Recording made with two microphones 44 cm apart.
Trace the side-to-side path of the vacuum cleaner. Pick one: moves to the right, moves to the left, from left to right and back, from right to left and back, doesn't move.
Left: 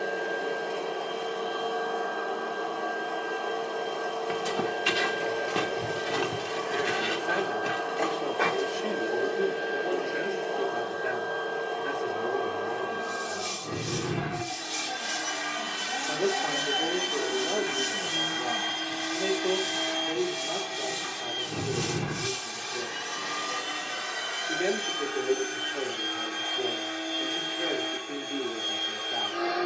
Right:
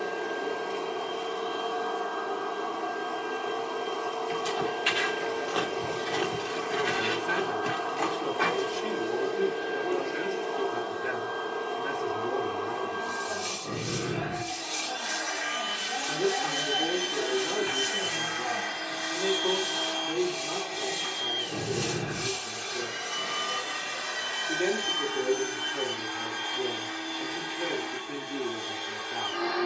from right to left and back.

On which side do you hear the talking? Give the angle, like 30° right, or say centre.
20° right.